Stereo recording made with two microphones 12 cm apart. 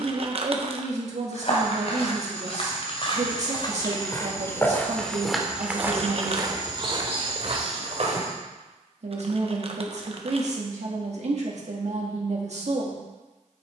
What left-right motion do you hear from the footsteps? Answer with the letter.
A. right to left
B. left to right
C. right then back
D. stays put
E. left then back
B.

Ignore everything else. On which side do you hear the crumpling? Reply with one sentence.
In this clip you hear the crumpling on the right.